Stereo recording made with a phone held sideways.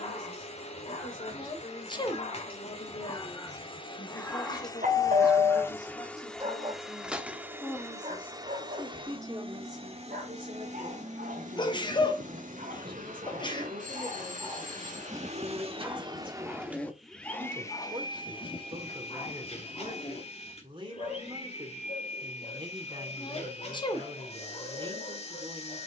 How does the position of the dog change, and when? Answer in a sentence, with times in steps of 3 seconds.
In this clip you hear the dog on the left from 0 s, in the centre from 3 s, on the right from 6 s, in the centre from 15 s and on the left from 18 s.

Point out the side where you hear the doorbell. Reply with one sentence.
You can hear the doorbell on the right.